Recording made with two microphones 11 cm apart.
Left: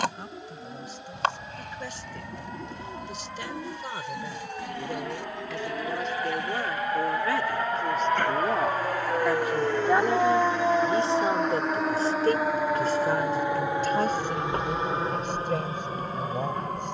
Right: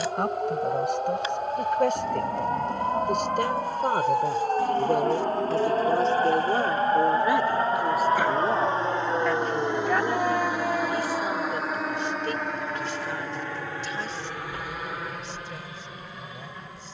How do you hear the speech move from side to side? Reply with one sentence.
In this clip you hear the speech move from right to left.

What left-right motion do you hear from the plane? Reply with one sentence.
You can hear the plane go from the right side to the left.